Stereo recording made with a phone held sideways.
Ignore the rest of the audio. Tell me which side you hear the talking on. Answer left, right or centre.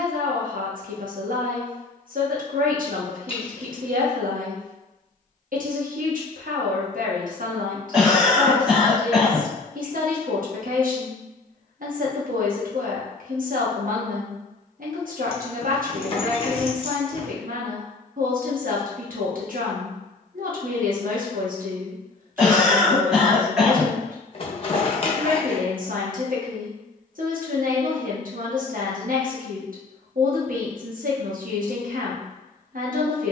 right.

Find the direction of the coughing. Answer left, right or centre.
centre.